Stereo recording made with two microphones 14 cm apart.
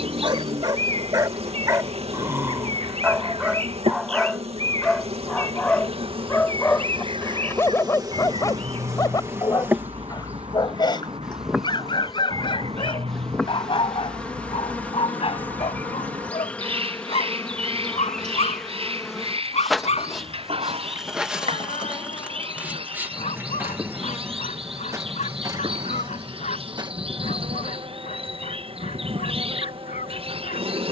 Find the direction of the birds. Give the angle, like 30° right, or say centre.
40° right.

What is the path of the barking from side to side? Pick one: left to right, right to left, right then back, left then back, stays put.
right to left.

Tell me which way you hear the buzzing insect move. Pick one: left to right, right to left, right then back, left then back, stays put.
left then back.